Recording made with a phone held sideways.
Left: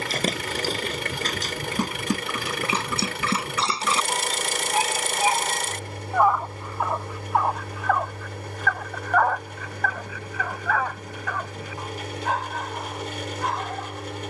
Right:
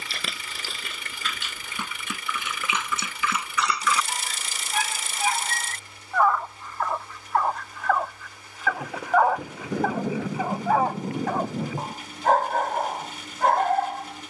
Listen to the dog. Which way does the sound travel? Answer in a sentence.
You can hear the dog travel towards the right.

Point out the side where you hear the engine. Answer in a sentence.
In this clip you hear the engine on the left.